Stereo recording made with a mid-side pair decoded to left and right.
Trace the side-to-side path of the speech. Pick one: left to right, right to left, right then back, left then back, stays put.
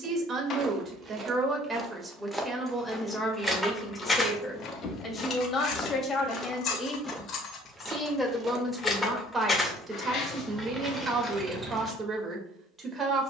left then back.